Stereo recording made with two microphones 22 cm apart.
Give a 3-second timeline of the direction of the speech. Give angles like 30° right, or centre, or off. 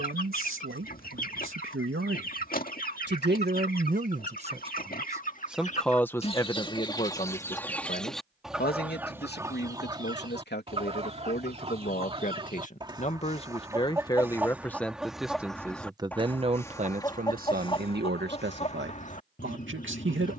70° right, 30° right, 30° left, 50° left, 20° left, 30° right, 60° right.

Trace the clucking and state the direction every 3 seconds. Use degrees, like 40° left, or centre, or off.
40° left, 40° left, 10° left, 20° right, 20° right, 10° left, 30° left.